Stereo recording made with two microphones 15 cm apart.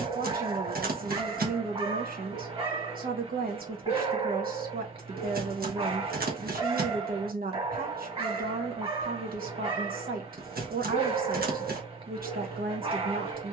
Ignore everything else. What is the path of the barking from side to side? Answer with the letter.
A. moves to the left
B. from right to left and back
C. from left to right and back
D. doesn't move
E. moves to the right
D.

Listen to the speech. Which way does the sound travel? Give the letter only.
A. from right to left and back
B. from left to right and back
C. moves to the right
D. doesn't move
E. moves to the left
D.